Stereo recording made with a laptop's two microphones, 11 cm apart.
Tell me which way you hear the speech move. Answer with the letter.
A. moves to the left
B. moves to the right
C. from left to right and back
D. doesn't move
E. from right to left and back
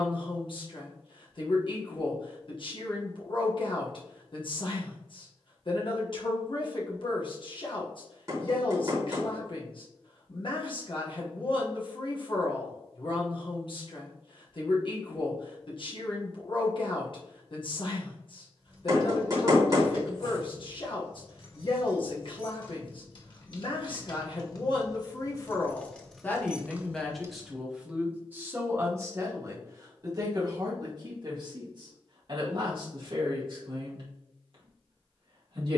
B.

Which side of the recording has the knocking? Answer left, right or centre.
right.